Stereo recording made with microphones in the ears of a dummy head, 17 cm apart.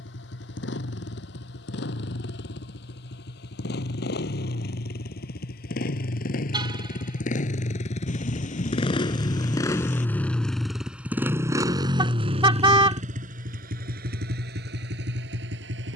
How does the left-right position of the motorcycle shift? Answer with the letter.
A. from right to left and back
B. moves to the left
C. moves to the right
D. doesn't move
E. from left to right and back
C.